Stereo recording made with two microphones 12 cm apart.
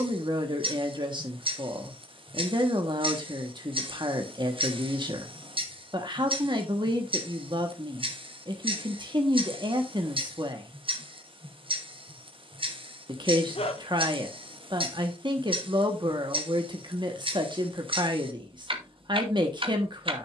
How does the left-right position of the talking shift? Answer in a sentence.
In this clip you hear the talking stay put.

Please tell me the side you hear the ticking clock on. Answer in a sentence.
You can hear the ticking clock on the right.